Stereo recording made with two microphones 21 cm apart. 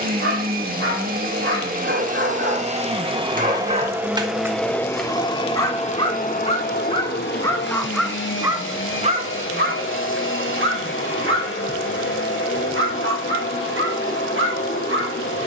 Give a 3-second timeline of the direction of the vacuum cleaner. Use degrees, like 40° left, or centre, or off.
40° right, centre, 50° left, 70° left, 70° left.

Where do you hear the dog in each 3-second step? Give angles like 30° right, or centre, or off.
60° right, 20° right, 10° left, 50° right, 70° right.